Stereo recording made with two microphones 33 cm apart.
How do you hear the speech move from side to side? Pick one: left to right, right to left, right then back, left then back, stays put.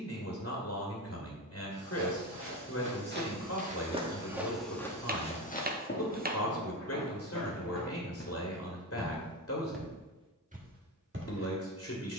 stays put.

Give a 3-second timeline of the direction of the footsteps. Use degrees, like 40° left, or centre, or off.
40° right, centre, 50° left, 10° right.